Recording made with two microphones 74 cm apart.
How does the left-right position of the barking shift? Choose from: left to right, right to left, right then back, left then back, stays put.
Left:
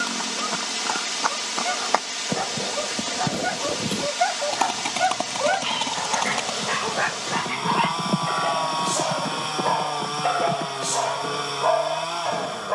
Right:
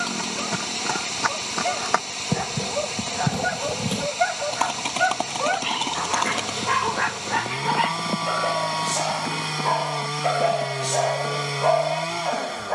right to left.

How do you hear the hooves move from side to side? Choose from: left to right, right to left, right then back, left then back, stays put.
right to left.